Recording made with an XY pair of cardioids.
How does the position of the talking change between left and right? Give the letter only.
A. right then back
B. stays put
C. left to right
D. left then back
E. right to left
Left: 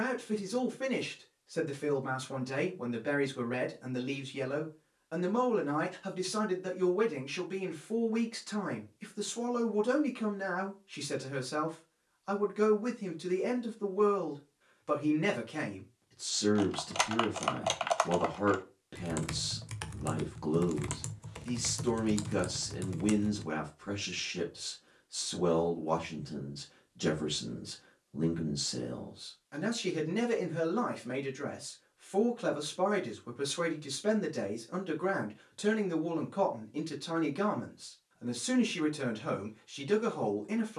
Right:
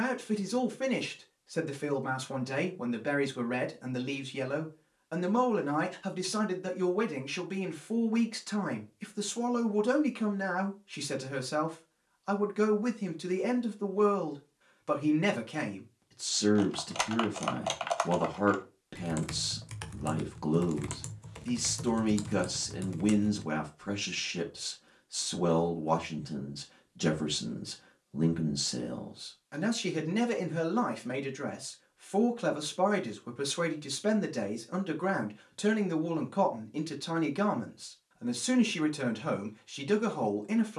B.